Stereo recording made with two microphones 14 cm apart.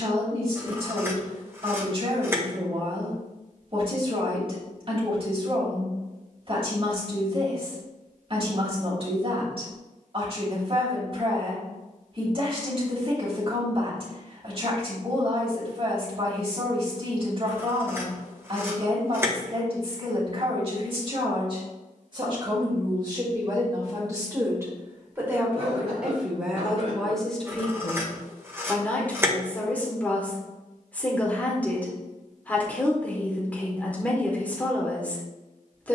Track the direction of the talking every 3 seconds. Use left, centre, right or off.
right, right, right, right, right, right, right, right, centre, centre, centre, centre.